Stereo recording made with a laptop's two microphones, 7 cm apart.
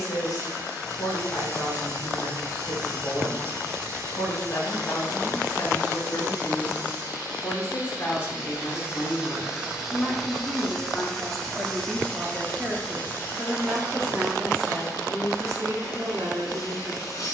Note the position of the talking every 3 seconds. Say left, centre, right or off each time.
left, left, left, centre, right, right.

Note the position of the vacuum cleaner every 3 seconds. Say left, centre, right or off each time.
right, right, right, centre, left, left.